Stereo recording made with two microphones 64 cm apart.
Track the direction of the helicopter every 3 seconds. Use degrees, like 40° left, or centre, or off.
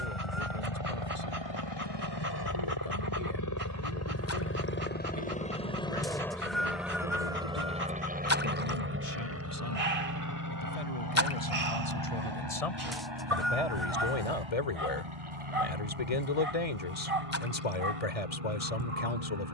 40° left, 20° left, 10° right, 30° right, 40° right, 50° right, 50° right.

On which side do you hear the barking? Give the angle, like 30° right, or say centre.
60° right.